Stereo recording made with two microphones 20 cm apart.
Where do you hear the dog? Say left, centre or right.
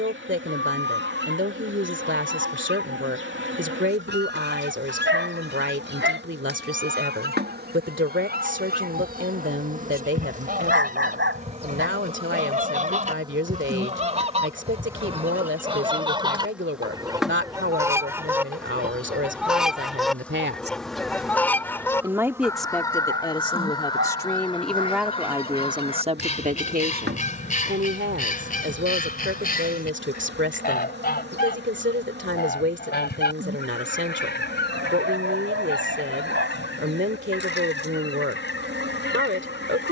right.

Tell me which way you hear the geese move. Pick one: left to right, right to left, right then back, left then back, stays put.
right to left.